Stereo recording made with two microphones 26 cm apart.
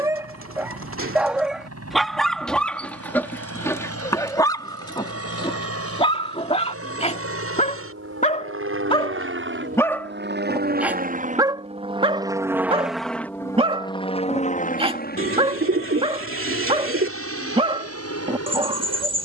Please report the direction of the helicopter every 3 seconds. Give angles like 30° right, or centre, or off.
80° right, 70° right, 60° right, 40° right, 10° left, 50° left, 60° left.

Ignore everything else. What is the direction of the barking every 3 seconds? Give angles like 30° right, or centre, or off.
centre, 10° left, 20° left, centre, 20° right, 20° right, 20° right.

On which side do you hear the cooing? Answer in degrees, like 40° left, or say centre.
50° right.